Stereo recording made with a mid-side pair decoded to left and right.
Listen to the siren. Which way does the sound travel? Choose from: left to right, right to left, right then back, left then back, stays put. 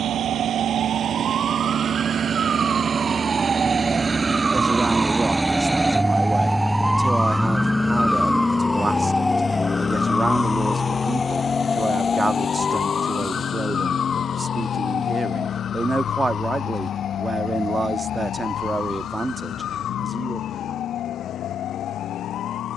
right to left.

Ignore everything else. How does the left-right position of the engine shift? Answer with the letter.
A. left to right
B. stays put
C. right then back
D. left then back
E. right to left
E.